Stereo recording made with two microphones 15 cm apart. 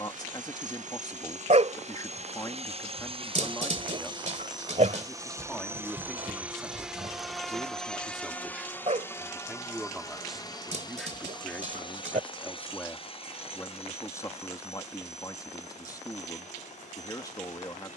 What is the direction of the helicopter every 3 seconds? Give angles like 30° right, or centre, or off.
50° right, 30° right, centre, 20° left, 40° left, 50° left.